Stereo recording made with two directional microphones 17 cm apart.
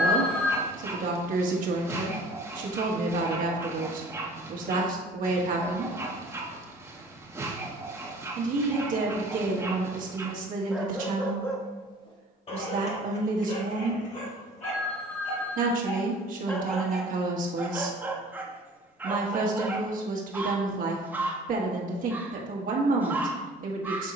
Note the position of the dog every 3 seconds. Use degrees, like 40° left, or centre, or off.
20° right, 20° right, 20° right, 10° right, 40° left, 10° left, 10° right, 10° right.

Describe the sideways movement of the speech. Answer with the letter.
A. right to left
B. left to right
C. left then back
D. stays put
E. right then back
D.